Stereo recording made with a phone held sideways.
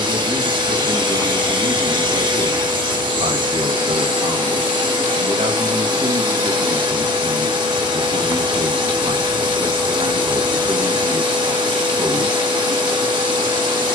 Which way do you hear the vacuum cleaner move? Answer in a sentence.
In this clip you hear the vacuum cleaner stay put.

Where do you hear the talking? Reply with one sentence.
You can hear the talking on the right.